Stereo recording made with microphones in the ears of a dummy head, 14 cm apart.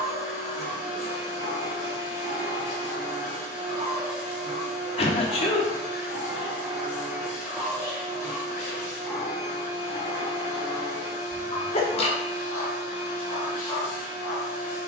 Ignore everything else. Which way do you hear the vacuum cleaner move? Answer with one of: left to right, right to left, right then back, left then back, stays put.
stays put.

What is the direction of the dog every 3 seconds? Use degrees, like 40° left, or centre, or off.
60° right, 30° right, centre, 20° left, 30° left.